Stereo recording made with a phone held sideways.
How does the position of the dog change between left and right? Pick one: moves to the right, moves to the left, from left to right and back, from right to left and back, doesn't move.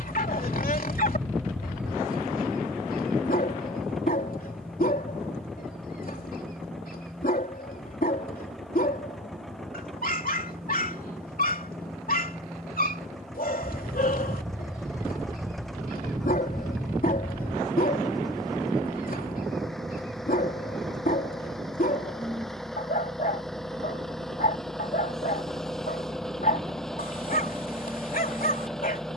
doesn't move.